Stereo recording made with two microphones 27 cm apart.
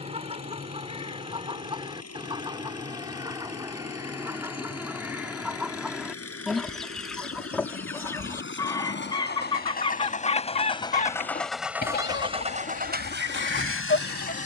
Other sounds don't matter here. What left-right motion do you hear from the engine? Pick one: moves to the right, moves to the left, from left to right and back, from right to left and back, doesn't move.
moves to the right.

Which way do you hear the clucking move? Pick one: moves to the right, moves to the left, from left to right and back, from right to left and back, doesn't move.
moves to the left.